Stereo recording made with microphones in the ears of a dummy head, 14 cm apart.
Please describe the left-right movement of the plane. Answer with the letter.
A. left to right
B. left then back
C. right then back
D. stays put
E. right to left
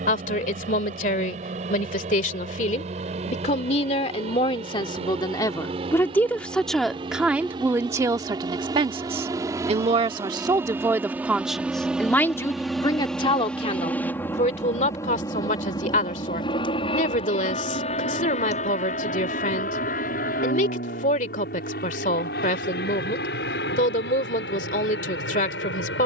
E.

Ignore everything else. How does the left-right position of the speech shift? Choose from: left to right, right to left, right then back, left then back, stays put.
right then back.